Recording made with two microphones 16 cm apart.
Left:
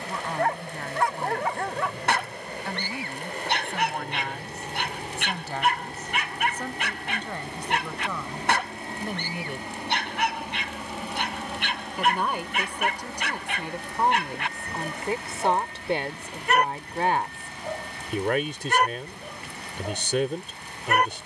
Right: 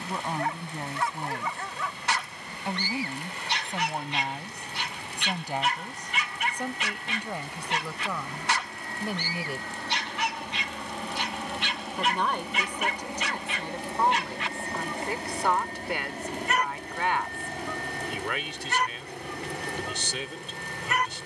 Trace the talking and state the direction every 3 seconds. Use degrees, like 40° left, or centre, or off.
20° right, 20° right, 10° right, centre, 10° left, 30° left, 50° left.